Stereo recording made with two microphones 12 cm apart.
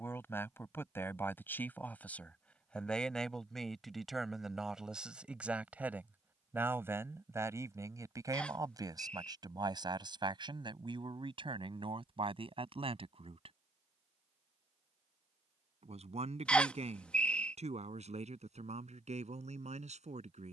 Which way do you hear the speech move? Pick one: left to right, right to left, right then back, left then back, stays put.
left to right.